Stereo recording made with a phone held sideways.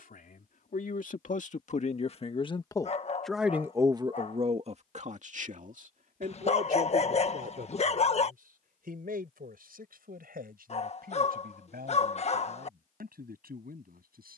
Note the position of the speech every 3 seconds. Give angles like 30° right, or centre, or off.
50° left, 40° right, 70° right, 80° right, 80° right.